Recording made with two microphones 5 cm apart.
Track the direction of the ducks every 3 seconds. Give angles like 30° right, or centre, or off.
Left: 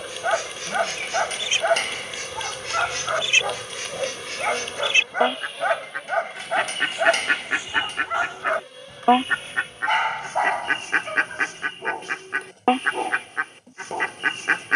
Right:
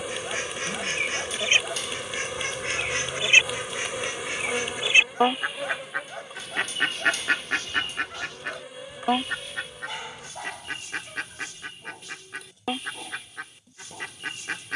30° right, 20° right, 10° left, 50° left, 50° left.